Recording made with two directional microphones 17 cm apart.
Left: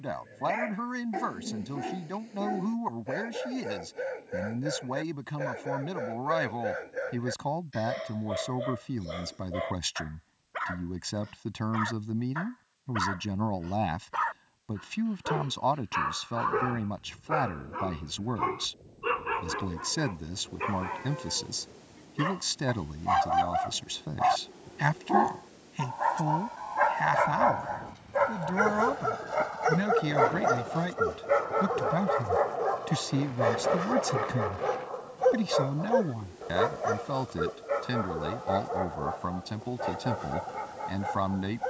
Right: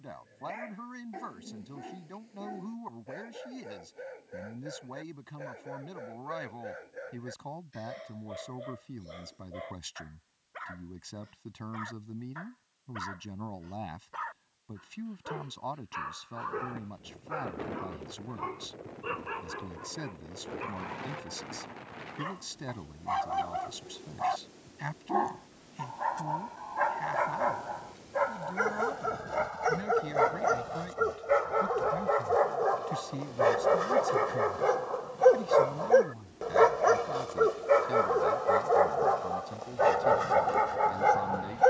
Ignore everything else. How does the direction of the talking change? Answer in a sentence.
You can hear the talking stay put.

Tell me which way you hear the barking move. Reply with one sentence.
You can hear the barking go from the left side to the right.